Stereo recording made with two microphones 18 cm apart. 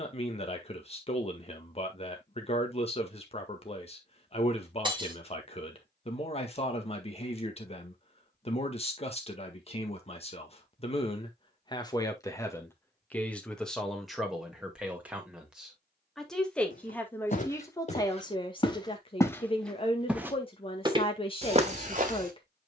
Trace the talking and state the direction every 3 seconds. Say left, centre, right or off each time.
left, left, left, left, centre, centre, left, left.